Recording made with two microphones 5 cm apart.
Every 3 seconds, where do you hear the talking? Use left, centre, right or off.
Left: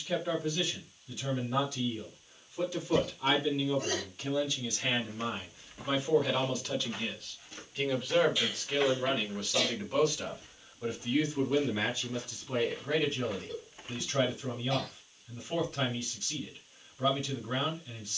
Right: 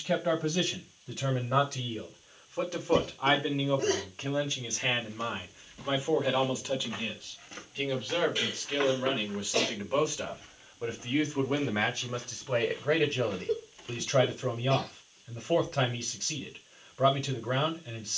right, right, centre, right, right, right.